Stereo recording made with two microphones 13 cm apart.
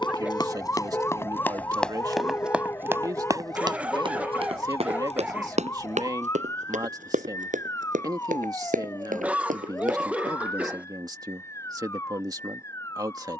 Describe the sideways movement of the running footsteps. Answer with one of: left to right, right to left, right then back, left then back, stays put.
left to right.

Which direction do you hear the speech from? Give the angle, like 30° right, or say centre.
30° right.